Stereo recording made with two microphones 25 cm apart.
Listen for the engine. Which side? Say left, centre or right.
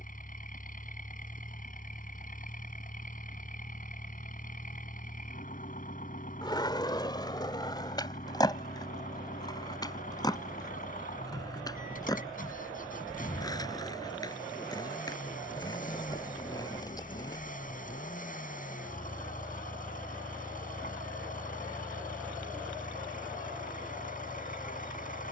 left.